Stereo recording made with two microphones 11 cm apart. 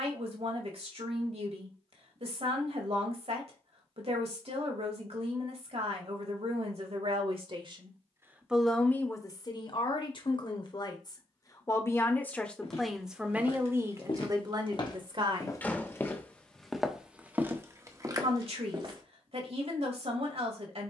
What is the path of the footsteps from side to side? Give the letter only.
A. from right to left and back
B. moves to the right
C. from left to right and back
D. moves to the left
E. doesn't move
B.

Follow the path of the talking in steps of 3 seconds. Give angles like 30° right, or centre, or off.
60° right, 60° right, 40° right, 40° left, 10° right, 50° right, 60° right.